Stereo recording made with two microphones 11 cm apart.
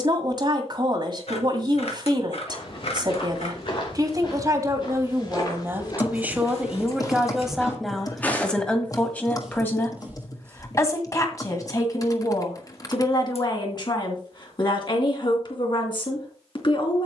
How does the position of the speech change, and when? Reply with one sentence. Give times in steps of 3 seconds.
You can hear the speech on the right from 0 s, in the centre from 6 s and on the left from 9 s.